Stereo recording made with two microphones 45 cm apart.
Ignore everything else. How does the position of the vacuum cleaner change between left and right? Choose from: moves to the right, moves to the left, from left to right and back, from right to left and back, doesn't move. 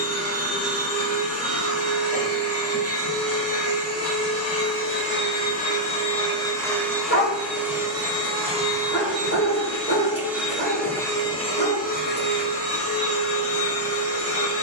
from left to right and back.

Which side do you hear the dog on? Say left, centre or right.
left.